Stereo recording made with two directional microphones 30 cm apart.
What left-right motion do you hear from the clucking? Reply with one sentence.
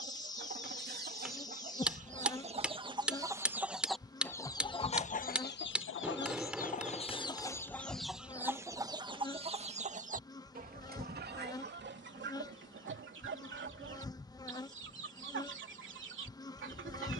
You can hear the clucking move from right to left and back again.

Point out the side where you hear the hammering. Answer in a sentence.
You can hear the hammering in the centre.